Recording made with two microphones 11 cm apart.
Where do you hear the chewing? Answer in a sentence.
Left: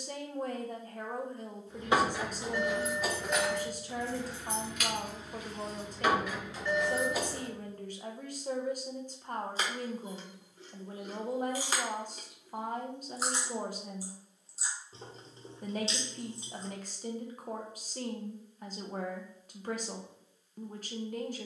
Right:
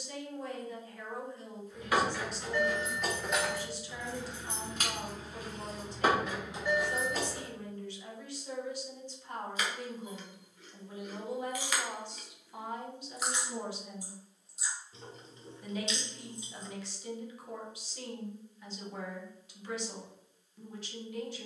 In this clip you hear the chewing on the left.